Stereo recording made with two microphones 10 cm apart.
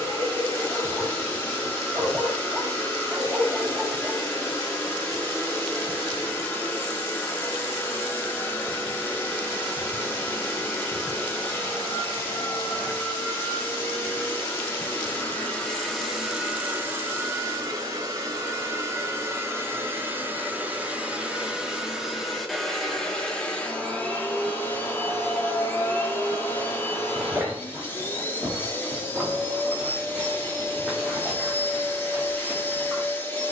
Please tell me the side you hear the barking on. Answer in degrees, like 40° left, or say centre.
10° right.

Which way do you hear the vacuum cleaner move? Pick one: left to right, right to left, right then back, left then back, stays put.
right then back.